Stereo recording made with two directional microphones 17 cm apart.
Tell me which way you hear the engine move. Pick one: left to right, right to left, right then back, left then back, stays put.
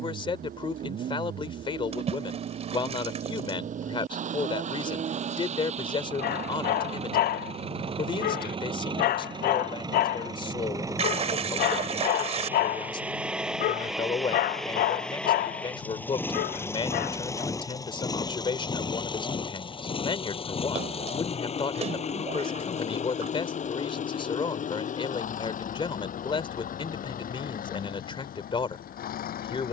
right to left.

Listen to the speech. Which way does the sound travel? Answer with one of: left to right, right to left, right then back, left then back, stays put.
stays put.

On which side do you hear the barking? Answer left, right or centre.
left.